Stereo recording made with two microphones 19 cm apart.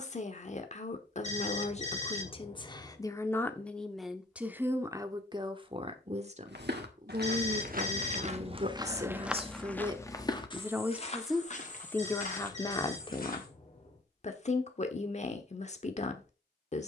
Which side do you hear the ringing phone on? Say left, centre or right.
left.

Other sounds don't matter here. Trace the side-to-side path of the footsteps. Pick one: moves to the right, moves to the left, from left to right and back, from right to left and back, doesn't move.
moves to the left.